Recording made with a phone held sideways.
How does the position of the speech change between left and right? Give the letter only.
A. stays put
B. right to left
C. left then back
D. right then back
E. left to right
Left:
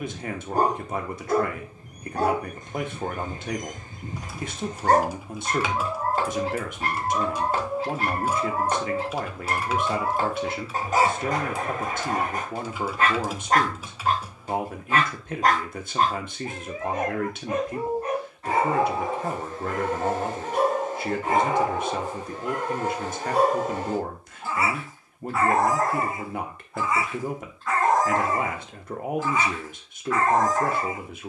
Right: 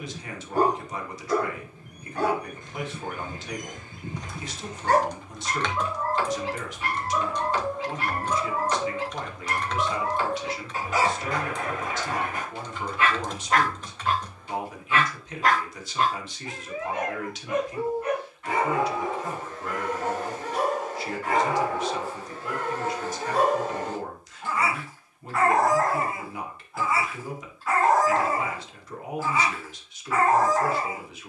A.